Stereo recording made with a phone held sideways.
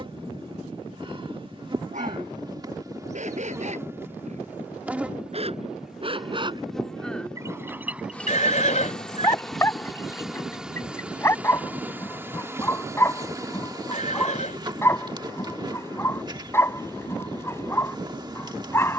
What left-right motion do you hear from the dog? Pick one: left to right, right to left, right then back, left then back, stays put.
right to left.